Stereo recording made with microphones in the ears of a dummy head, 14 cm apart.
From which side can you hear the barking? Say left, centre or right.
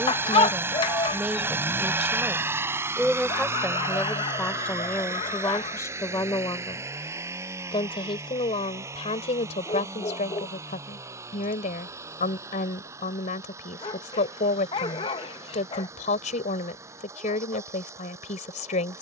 left.